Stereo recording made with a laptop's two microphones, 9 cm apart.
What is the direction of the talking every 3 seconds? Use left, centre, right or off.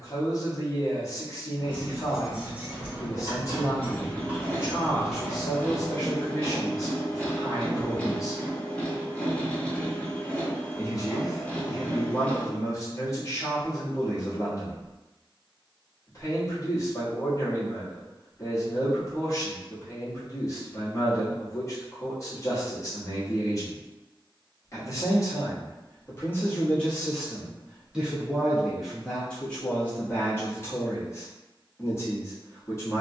left, left, left, left, left, left, left, left, left, centre, left.